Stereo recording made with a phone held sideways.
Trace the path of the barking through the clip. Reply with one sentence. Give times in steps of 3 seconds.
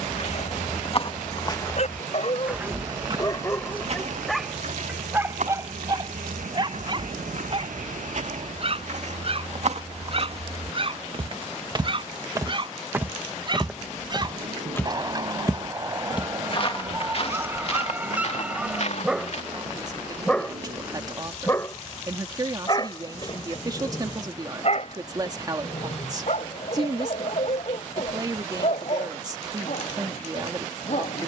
In this clip you hear the barking on the left from 0 s, in the centre from 3 s, on the right from 6 s, in the centre from 18 s and on the left from 21 s.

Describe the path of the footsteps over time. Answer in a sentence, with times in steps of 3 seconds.
You can hear the footsteps on the left from 0 s, on the right from 3 s, in the centre from 12 s, on the left from 15 s and not at all from 21 s.